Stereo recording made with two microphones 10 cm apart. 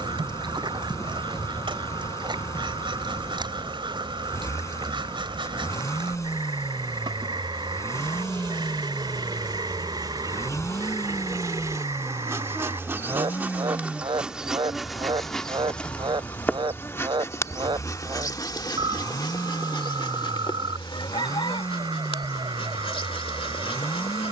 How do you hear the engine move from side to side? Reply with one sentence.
In this clip you hear the engine stay put.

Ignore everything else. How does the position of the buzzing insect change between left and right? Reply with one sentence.
In this clip you hear the buzzing insect move to the left.